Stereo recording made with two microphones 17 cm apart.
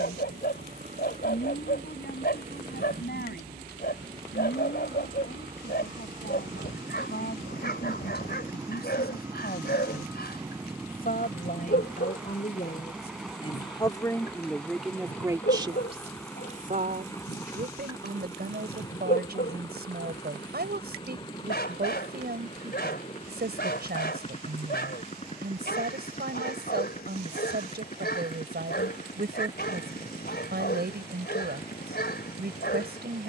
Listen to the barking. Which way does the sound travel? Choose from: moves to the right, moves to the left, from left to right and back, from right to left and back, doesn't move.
doesn't move.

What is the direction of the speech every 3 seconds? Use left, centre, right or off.
left, left, left, left, left, right, right, right, right, right, right.